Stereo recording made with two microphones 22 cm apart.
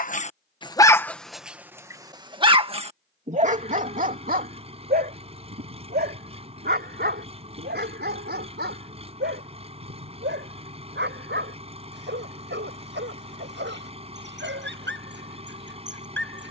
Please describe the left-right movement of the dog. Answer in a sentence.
In this clip you hear the dog go from the left side to the right.